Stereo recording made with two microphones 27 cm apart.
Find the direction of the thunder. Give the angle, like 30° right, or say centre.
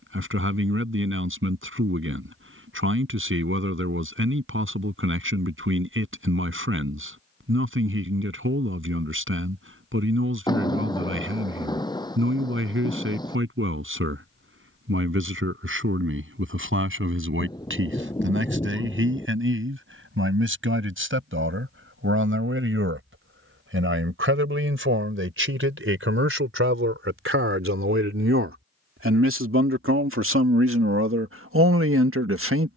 10° left.